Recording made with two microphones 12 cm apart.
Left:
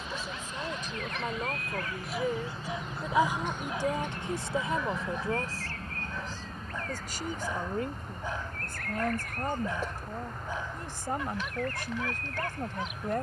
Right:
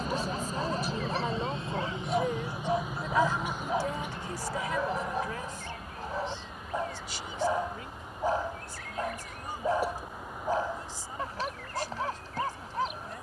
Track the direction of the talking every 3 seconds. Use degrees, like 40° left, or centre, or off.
centre, 20° left, 50° left, 60° left, 60° left.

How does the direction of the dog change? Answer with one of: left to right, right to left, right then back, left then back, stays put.
stays put.